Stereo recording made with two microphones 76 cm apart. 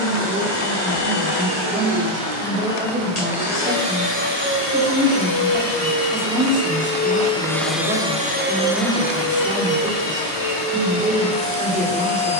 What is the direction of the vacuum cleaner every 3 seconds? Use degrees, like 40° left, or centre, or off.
60° left, 40° left, 10° left, 50° left.